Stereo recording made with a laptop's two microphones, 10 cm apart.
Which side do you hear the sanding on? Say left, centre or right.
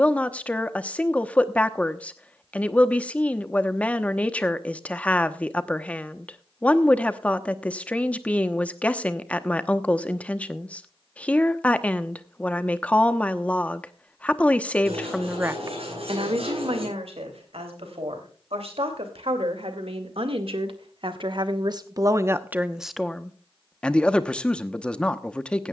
right.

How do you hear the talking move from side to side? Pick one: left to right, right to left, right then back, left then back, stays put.
right then back.